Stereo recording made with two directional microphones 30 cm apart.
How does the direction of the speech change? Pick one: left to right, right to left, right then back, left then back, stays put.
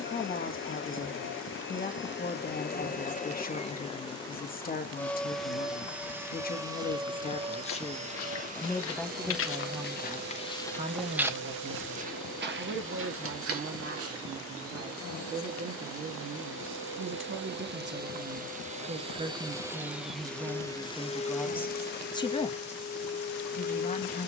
right then back.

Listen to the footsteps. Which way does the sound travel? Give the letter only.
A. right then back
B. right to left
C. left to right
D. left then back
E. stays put
C.